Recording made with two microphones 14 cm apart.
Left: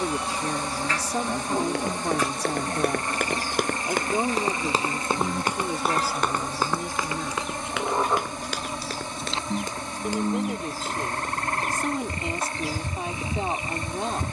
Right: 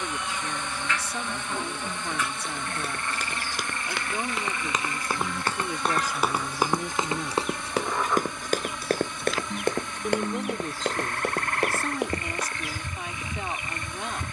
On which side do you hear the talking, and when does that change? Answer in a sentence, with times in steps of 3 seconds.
In this clip you hear the talking on the left from 0 s, in the centre from 6 s and on the left from 12 s.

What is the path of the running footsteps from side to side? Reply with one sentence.
You can hear the running footsteps move from left to right.